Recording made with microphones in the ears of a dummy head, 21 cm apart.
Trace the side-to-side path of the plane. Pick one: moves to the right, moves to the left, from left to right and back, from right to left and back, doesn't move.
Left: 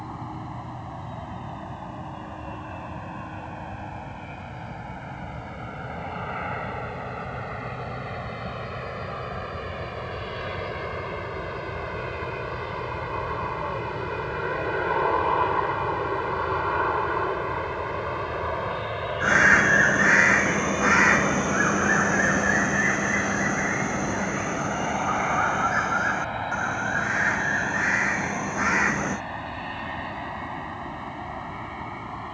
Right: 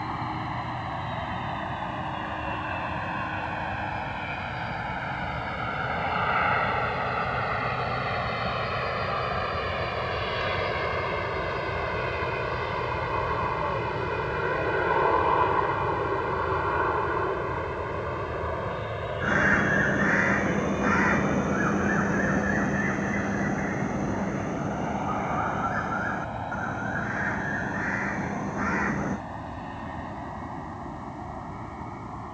moves to the left.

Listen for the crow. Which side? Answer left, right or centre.
left.